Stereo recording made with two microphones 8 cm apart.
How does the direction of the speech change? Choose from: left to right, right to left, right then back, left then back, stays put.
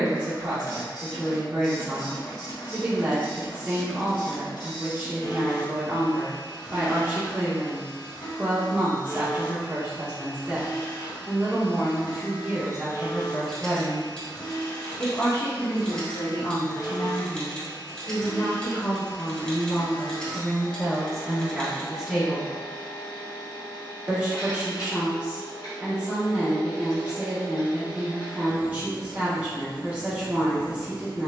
left then back.